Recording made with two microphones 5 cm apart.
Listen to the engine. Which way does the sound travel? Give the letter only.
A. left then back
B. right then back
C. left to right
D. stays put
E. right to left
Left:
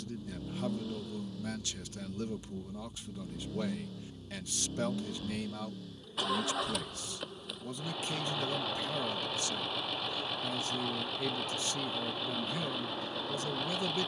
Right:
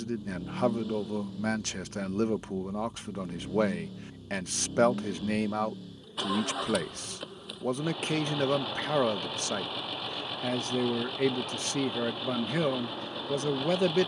D.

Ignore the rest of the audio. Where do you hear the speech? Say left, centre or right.
right.